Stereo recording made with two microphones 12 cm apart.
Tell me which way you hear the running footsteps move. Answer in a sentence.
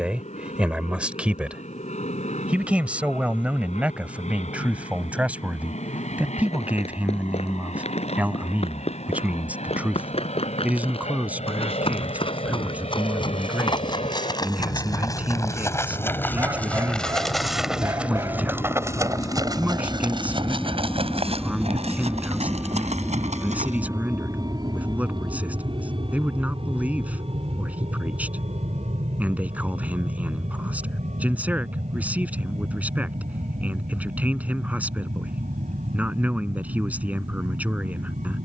You can hear the running footsteps go from the left side to the right.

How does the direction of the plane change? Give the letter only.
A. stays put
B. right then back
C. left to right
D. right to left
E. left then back
C.